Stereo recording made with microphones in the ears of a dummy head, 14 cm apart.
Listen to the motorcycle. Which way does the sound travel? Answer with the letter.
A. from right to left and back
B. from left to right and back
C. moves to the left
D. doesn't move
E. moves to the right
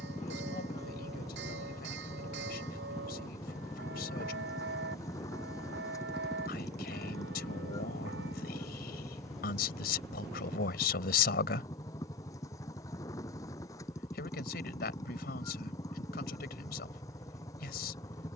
D.